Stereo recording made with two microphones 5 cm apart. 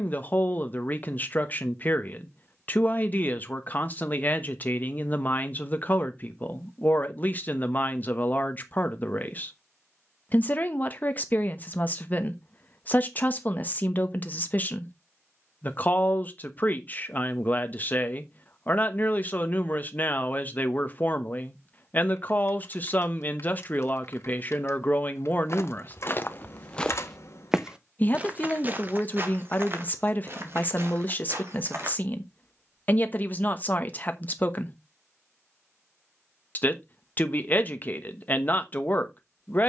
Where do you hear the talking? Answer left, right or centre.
left.